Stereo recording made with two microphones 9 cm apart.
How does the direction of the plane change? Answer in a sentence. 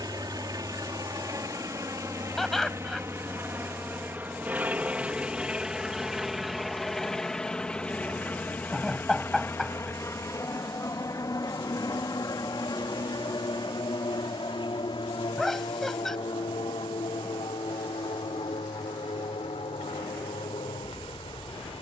You can hear the plane travel towards the left.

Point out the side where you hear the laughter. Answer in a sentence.
You can hear the laughter in the centre.